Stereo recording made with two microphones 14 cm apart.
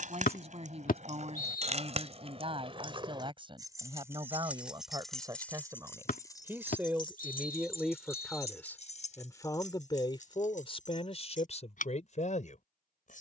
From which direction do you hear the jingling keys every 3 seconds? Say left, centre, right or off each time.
right, centre, left, left, off.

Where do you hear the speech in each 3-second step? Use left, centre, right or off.
right, right, centre, left, left.